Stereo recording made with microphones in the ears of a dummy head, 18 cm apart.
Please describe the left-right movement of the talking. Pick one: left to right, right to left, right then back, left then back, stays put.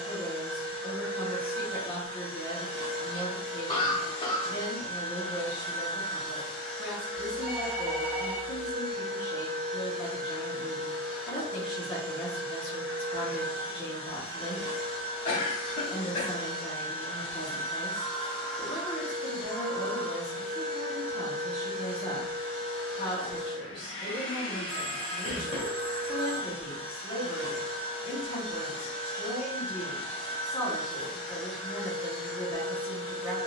stays put.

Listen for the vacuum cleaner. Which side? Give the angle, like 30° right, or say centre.
20° left.